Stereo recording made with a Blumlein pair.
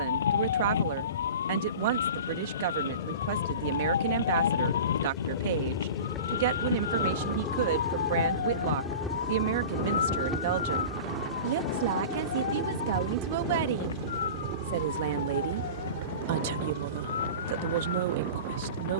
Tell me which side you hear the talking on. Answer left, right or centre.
right.